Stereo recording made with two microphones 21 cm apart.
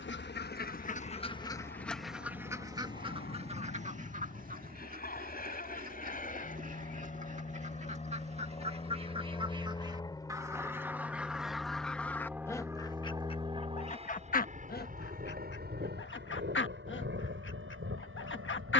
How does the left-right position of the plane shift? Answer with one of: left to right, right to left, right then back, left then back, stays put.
left to right.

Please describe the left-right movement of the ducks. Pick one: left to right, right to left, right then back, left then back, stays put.
right then back.